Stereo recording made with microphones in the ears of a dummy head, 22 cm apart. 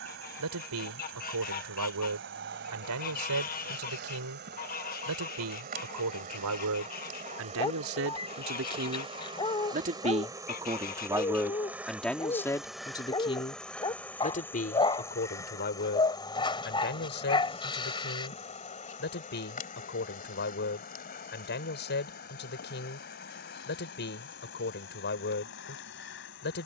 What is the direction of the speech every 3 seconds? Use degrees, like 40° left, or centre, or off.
70° right, 70° right, 60° right, 20° right, 20° left, 40° left, 40° left, 40° left, 40° left.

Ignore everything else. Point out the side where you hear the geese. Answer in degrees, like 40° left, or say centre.
40° left.